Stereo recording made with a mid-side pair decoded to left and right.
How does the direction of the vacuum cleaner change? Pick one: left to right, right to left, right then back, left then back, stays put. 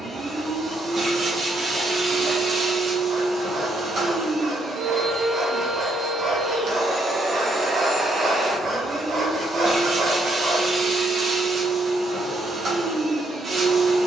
stays put.